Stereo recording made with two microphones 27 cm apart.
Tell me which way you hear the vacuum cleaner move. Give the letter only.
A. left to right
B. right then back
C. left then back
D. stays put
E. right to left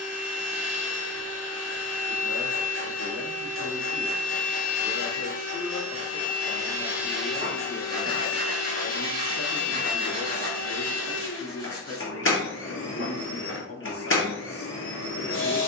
E.